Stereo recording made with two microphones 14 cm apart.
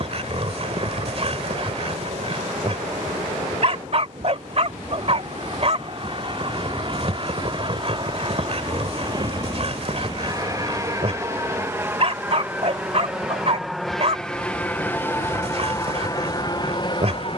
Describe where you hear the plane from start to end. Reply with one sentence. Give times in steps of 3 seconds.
In this clip you hear the plane on the right from 0 s, in the centre from 12 s and on the left from 15 s.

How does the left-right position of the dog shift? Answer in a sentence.
You can hear the dog stay put.